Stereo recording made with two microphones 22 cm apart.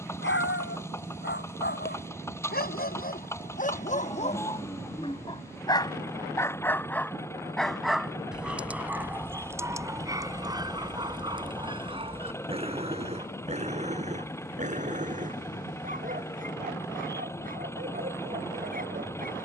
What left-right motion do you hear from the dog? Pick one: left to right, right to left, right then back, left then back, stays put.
left to right.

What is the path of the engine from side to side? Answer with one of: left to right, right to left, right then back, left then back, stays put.
stays put.